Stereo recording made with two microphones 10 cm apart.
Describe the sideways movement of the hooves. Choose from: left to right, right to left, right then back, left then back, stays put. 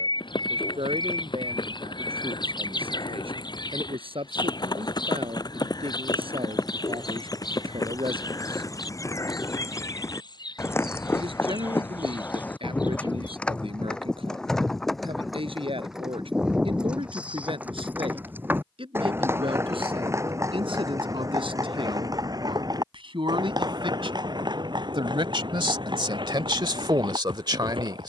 left to right.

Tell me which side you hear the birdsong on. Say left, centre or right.
left.